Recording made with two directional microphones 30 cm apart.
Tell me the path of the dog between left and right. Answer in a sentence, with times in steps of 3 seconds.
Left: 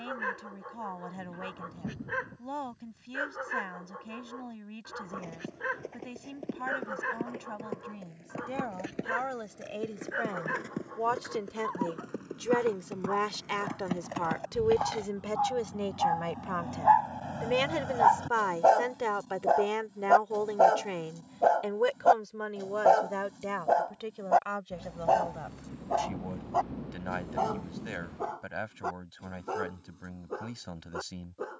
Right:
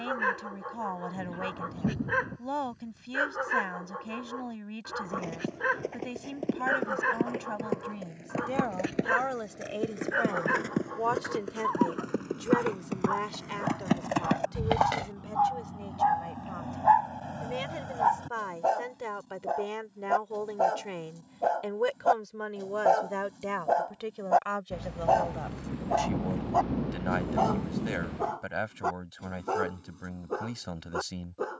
You can hear the dog on the right from 0 s, in the centre from 15 s, on the left from 18 s, in the centre from 21 s and on the right from 27 s.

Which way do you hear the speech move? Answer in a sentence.
You can hear the speech move from right to left and back again.